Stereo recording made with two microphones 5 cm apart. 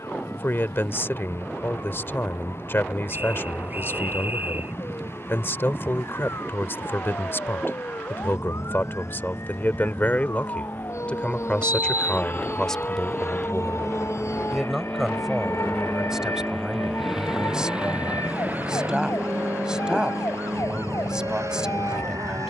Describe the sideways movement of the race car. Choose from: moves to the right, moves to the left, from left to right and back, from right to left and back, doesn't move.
moves to the right.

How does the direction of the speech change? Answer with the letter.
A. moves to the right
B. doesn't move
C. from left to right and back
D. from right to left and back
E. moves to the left
A.